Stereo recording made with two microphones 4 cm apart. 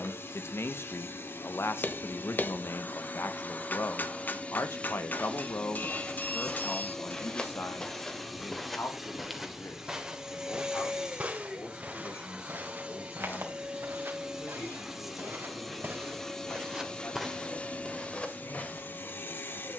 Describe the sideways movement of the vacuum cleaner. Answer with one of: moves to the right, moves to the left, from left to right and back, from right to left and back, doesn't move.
from left to right and back.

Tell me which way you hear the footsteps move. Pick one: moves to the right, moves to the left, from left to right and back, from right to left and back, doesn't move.
from left to right and back.